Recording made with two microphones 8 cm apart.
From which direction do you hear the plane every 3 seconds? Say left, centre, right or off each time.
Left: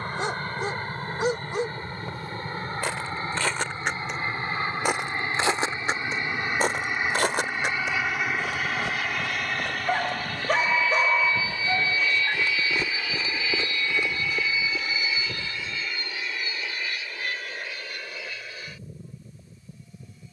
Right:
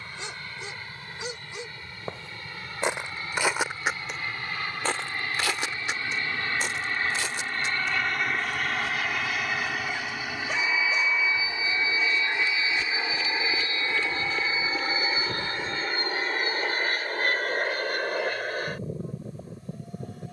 left, left, centre, centre, right, right, right.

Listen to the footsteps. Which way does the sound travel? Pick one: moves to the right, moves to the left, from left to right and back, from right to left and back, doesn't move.
from right to left and back.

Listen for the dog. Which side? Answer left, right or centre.
left.